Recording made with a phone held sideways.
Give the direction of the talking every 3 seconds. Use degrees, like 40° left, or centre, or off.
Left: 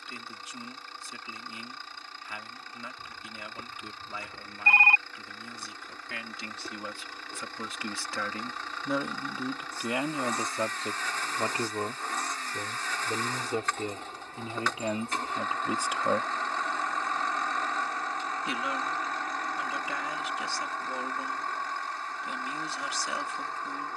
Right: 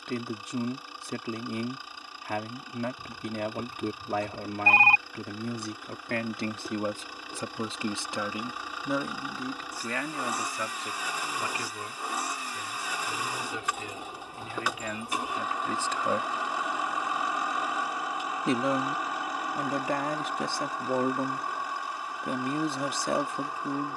60° right, 60° right, 30° right, 20° left, 40° left, 20° left, 50° right, 50° right.